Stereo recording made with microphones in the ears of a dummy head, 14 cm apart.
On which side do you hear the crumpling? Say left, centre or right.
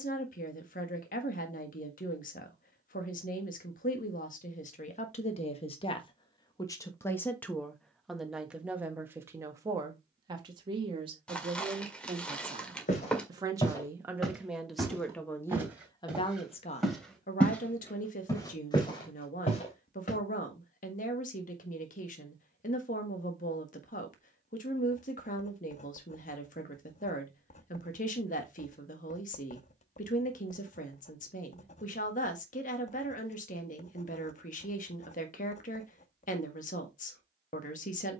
centre.